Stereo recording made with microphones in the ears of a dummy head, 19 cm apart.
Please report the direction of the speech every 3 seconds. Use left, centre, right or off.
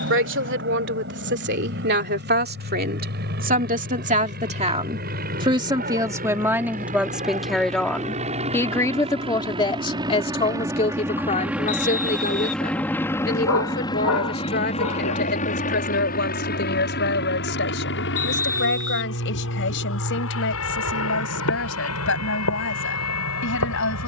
right, right, centre, left, left, left, left, left.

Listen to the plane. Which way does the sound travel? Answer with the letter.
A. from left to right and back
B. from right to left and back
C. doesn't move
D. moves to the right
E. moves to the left
E.